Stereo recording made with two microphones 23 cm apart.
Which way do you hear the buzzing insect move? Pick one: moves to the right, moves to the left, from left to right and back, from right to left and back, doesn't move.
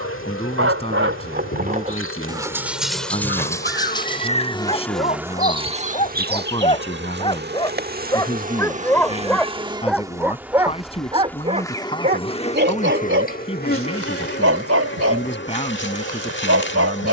from left to right and back.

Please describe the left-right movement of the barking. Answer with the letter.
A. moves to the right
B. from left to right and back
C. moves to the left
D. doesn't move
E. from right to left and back
E.